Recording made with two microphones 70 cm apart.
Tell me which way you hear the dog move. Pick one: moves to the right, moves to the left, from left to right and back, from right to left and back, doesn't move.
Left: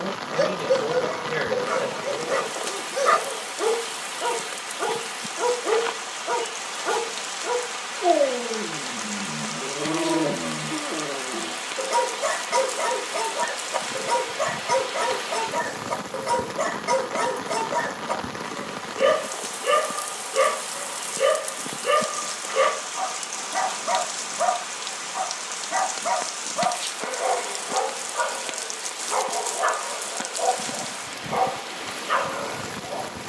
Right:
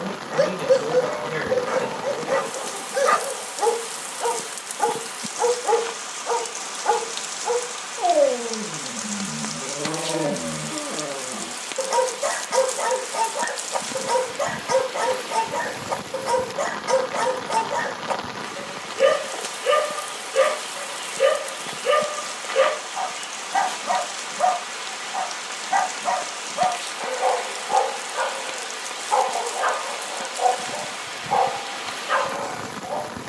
doesn't move.